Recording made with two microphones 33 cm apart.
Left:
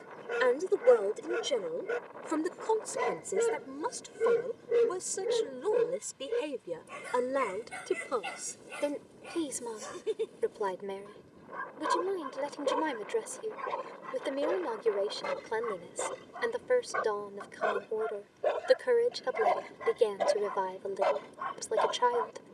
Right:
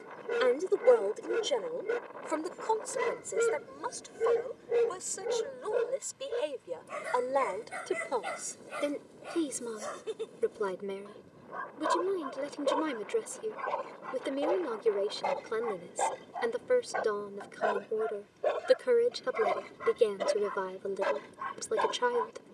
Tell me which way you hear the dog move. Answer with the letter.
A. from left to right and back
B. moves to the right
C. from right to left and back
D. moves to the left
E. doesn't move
C.